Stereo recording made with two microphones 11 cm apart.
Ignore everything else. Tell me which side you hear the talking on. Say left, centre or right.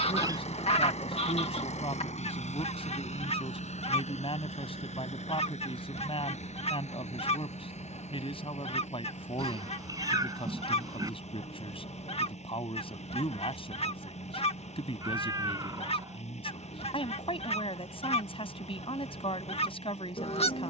left.